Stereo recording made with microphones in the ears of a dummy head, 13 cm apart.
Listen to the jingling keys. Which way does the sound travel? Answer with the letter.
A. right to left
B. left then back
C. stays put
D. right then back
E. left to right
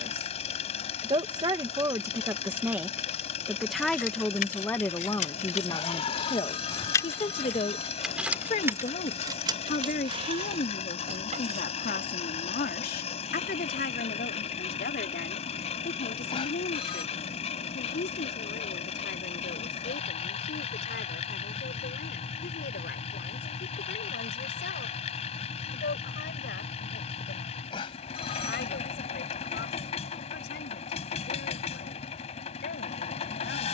E.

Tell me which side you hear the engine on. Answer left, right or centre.
left.